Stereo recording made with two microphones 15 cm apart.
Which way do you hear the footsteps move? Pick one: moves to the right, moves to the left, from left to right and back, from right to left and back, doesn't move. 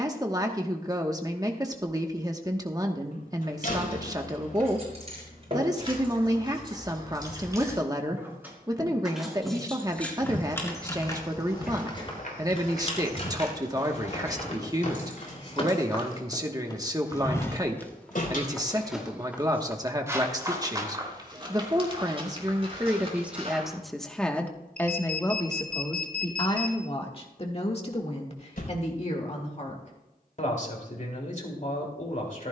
moves to the right.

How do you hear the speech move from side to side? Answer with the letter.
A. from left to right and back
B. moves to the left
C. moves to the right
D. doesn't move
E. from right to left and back
B.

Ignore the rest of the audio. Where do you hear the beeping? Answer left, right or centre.
left.